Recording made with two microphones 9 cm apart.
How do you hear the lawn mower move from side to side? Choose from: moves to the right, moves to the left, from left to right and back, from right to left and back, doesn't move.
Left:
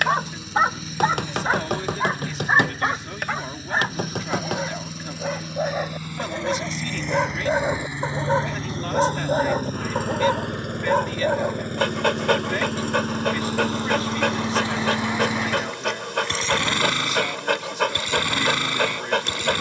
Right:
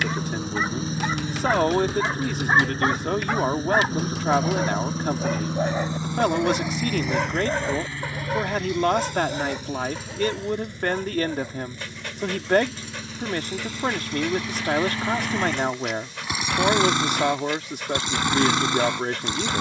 from right to left and back.